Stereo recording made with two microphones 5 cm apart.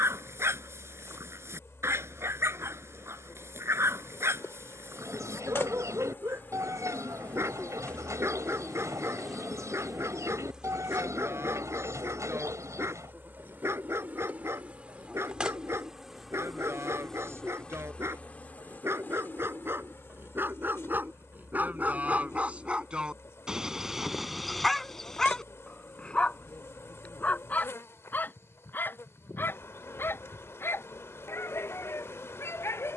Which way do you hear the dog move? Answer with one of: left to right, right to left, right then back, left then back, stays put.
right to left.